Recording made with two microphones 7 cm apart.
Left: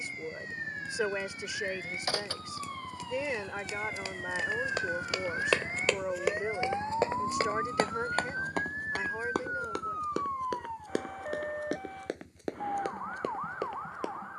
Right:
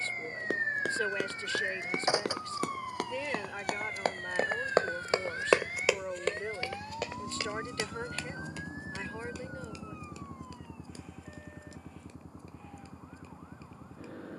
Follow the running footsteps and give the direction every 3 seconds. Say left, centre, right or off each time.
right, right, left, left, left.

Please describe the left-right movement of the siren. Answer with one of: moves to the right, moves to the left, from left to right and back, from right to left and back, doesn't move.
moves to the left.